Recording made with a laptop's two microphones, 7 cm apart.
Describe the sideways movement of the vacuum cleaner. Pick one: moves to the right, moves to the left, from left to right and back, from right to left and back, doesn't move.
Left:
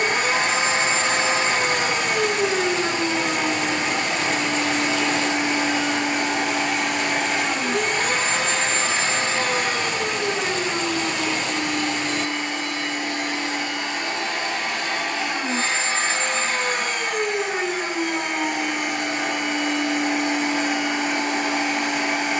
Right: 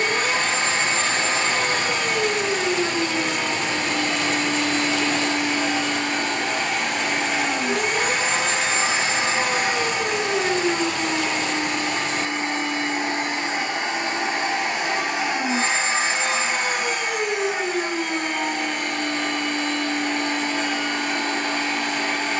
from left to right and back.